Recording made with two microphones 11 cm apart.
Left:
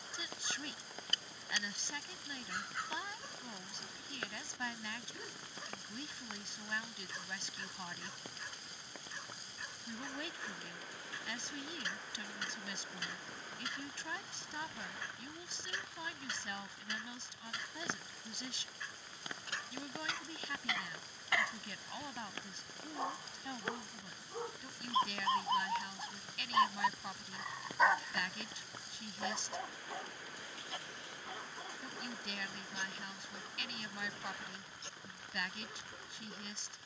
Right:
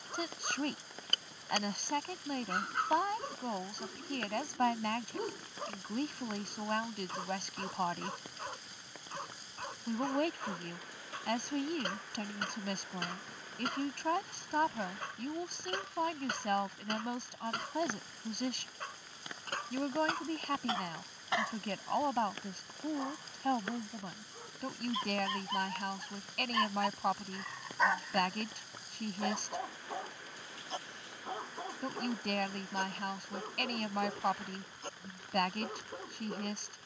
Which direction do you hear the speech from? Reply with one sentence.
In this clip you hear the speech on the right.